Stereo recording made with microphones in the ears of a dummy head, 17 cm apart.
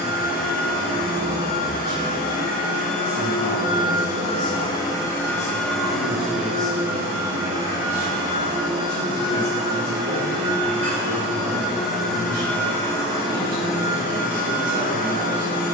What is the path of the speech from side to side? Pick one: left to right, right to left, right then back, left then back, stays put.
left to right.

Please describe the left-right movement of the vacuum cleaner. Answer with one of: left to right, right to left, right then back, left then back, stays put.
right then back.